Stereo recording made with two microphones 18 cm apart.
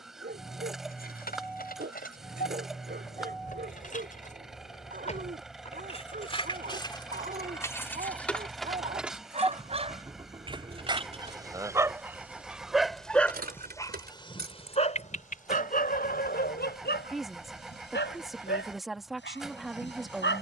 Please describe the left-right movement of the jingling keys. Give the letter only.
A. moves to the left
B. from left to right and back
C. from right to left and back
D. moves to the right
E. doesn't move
D.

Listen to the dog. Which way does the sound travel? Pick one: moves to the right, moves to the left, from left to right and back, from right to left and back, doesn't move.
moves to the left.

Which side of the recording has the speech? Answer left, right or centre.
centre.